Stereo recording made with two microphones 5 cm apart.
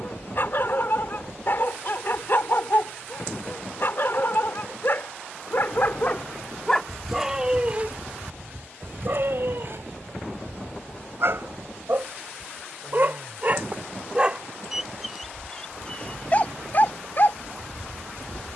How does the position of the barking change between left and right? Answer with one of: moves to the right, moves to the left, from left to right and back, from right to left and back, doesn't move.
from left to right and back.